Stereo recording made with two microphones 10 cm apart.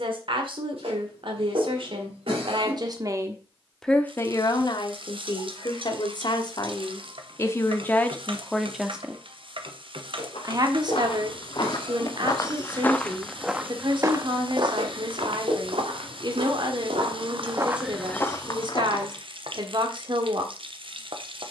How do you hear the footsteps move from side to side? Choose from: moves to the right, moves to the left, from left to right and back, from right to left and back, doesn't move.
from left to right and back.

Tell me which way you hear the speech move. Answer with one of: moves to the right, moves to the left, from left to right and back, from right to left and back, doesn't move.
from right to left and back.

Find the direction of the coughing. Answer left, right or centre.
right.